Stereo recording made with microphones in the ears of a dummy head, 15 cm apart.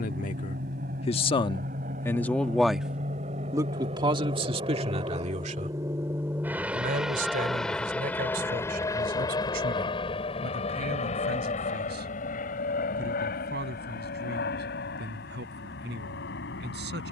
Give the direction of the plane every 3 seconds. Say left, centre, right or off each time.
right, right, centre, left, left, left.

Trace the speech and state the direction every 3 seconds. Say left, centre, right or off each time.
left, right, right, right, right, right.